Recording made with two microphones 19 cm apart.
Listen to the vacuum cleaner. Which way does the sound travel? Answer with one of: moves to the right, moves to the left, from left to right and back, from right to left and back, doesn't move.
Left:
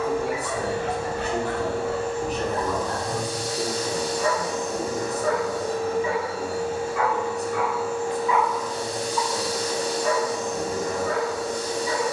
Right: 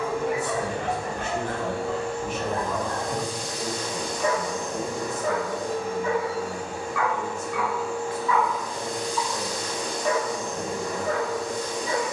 doesn't move.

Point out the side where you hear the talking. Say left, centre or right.
left.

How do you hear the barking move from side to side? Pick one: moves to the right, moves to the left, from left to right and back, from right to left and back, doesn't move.
from right to left and back.